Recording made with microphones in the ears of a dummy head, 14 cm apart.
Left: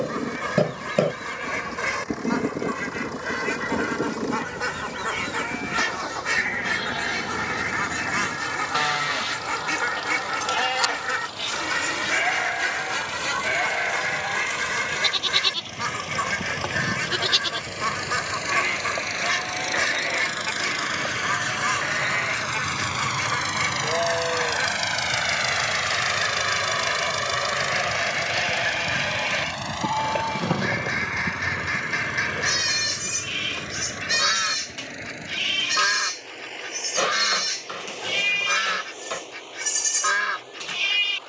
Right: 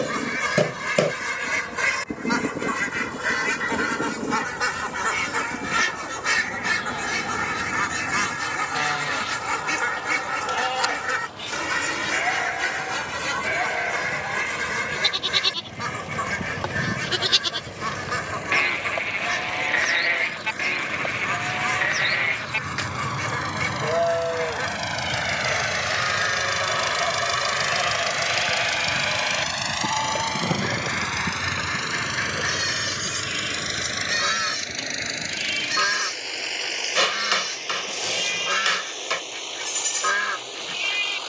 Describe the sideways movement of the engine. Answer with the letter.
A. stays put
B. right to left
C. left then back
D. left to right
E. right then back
D.